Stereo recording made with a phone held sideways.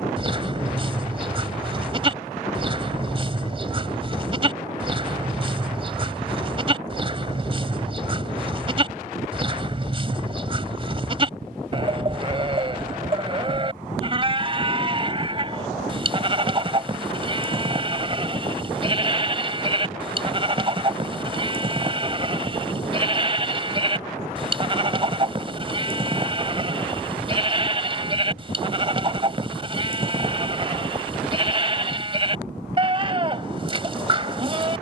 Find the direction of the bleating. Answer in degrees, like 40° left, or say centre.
40° right.